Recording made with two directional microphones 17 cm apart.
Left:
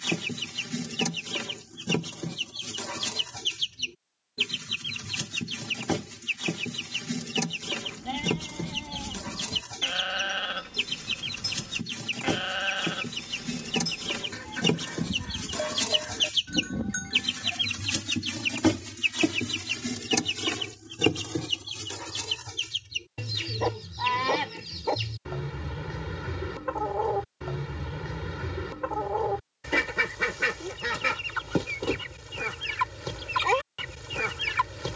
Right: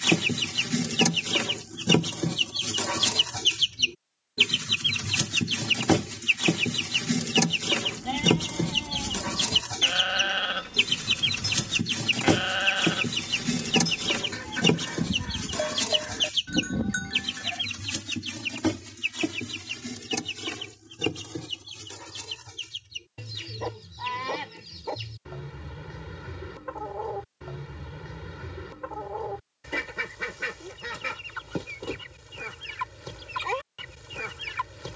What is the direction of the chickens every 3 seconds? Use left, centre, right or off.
right, right, right, right, right, centre, left, left, left, left, left, left.